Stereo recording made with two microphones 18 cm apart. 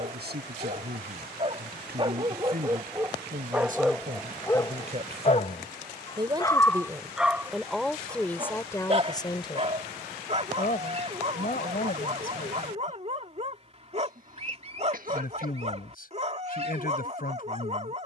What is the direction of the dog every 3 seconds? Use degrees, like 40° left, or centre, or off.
30° right, 10° left, centre, 40° right, 40° right, 40° right.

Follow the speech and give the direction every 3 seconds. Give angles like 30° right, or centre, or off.
60° right, 40° right, centre, 40° left, 50° left, 50° left.